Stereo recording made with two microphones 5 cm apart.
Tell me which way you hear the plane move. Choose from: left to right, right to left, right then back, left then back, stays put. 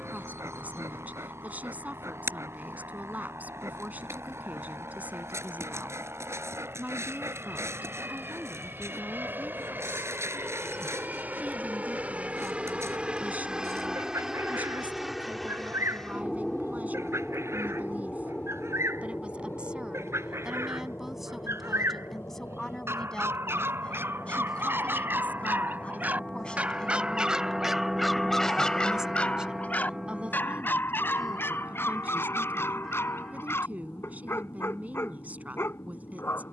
right to left.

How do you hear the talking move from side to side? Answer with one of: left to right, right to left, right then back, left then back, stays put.
left then back.